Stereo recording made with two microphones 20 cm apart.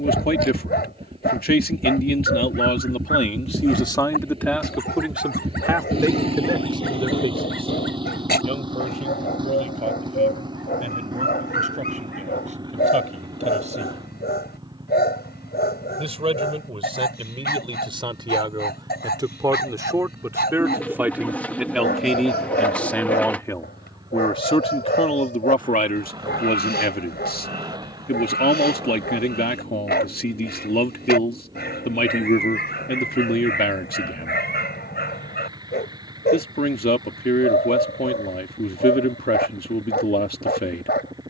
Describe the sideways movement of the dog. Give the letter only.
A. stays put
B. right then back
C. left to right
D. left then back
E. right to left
A.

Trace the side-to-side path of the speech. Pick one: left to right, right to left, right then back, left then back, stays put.
right then back.